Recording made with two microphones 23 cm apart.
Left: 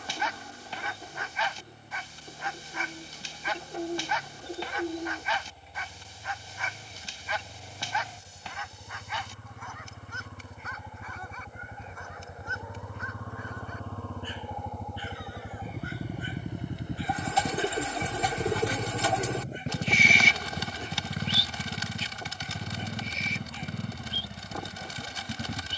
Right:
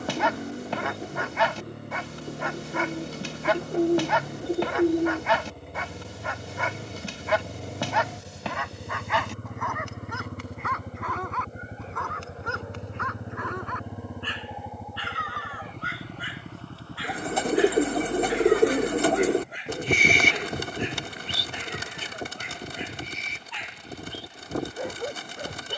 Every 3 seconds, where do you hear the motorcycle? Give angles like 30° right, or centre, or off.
80° right, 70° right, 60° right, 50° right, 20° right, 10° left, 40° left, 50° left, 60° left.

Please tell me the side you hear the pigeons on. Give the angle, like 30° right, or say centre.
50° right.